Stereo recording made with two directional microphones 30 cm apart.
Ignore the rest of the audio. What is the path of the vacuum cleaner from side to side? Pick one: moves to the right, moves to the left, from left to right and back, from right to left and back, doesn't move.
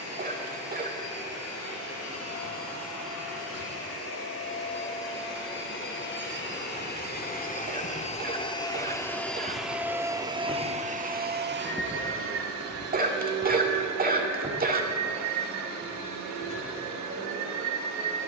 moves to the right.